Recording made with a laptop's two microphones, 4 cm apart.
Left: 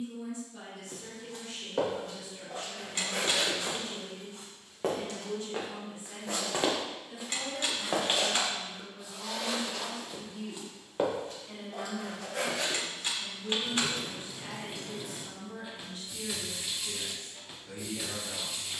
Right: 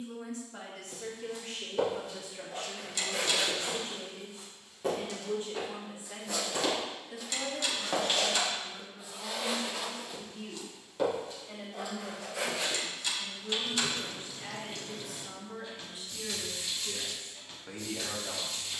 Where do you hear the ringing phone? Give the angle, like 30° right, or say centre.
30° left.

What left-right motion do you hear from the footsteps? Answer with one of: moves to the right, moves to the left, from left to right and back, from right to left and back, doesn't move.
from left to right and back.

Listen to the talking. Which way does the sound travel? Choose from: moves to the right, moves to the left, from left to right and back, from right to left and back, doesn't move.
from right to left and back.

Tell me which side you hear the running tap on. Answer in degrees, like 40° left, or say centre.
10° left.